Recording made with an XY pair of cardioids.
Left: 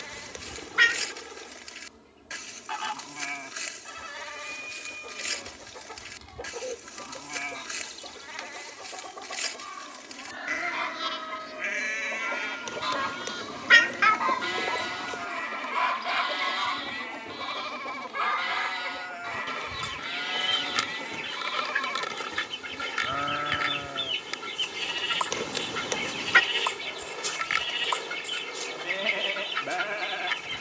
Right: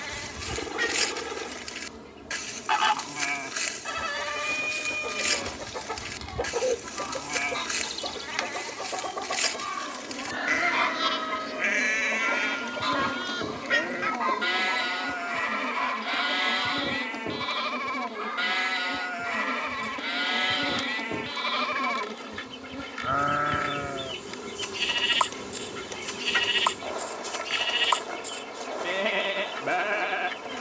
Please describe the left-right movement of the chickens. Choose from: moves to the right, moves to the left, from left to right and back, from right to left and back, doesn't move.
moves to the left.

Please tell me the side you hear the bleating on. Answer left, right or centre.
right.